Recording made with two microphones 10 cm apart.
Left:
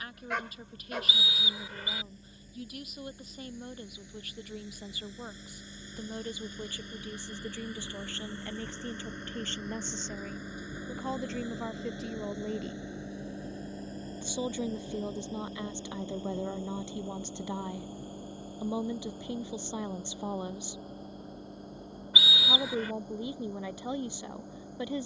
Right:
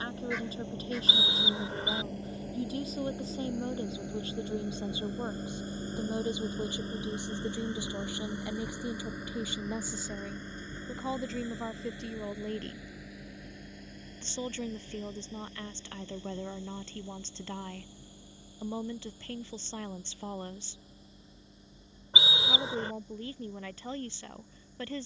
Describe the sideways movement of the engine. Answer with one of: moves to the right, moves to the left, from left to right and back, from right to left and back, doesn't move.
moves to the left.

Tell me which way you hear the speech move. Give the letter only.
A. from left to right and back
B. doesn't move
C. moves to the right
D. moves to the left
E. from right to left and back
D.